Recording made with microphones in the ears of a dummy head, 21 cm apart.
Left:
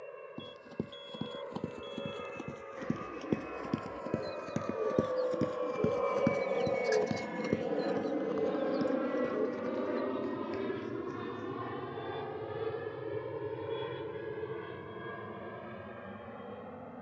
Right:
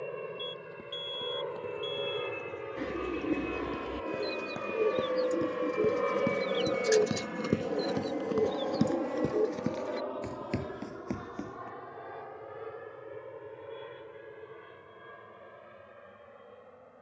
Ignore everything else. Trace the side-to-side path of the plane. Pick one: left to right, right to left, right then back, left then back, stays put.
right to left.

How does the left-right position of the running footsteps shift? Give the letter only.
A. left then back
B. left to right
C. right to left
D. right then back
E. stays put
B.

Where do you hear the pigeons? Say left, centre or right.
right.